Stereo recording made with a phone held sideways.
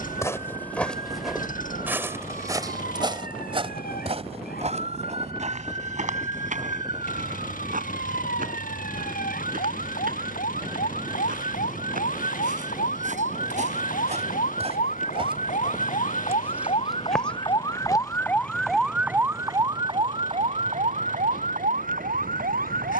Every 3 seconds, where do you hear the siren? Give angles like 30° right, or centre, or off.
80° left, 80° left, 80° left, 70° left, 70° left, 40° left, 20° right, 60° right.